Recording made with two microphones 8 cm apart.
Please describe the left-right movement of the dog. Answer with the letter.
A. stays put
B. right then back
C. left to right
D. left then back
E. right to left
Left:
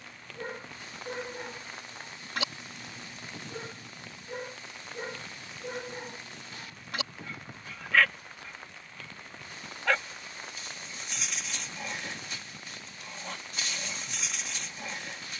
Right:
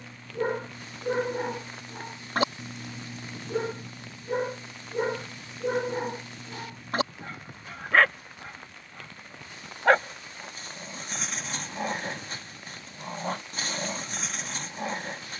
A.